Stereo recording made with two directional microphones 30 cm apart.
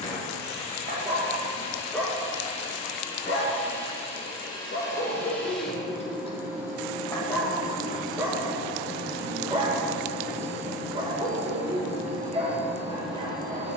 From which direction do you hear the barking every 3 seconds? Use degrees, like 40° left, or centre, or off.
centre, 30° left, centre, 20° right, 20° right.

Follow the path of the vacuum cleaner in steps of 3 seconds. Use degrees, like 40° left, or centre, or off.
20° left, 10° left, 20° right, 50° right, 60° right.